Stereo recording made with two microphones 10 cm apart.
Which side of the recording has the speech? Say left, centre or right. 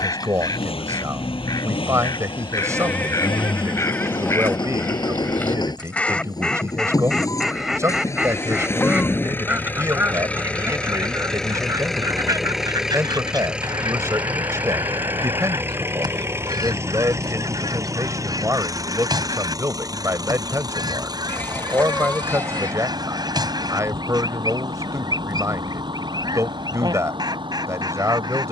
right.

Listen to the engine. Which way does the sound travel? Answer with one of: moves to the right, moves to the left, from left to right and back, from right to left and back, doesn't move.
moves to the right.